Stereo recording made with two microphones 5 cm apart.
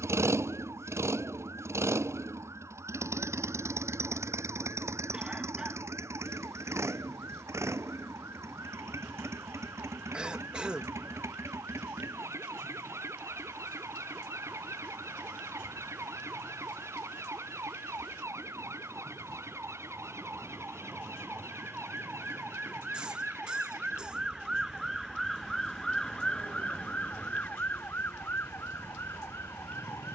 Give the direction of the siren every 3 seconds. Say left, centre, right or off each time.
right, right, right, right, right, right, right, right, centre, left.